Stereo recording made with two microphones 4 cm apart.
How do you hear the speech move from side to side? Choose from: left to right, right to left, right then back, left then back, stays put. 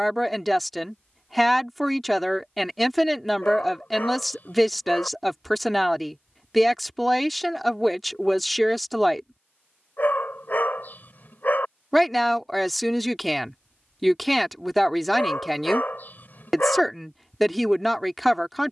stays put.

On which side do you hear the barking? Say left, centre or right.
left.